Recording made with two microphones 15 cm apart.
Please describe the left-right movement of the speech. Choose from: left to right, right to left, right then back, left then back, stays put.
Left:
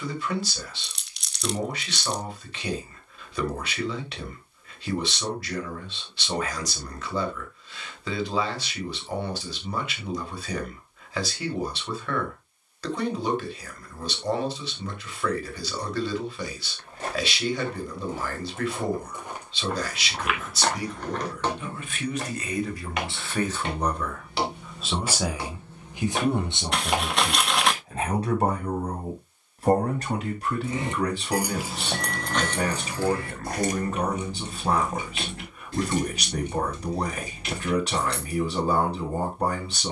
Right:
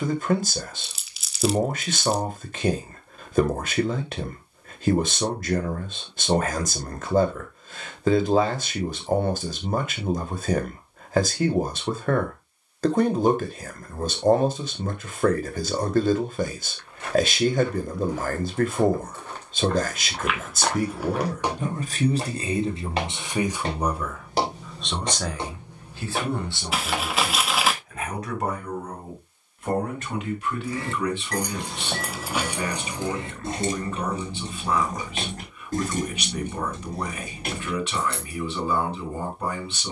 right to left.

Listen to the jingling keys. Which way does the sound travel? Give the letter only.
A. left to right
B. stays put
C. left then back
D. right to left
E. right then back
A.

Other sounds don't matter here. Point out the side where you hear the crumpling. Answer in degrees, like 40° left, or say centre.
centre.